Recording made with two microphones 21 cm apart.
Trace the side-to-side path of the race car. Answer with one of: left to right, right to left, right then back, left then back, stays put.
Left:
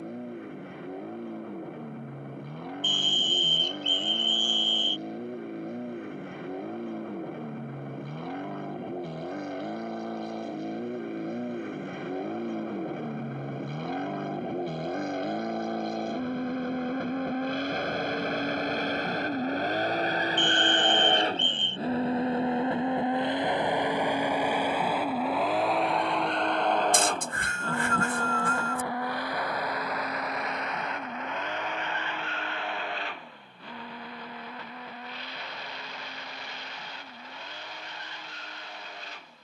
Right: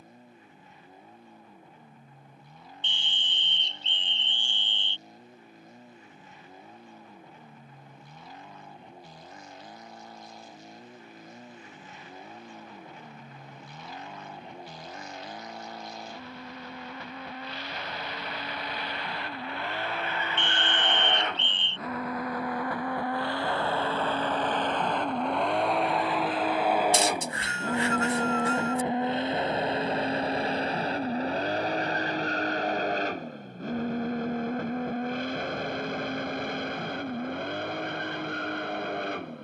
left to right.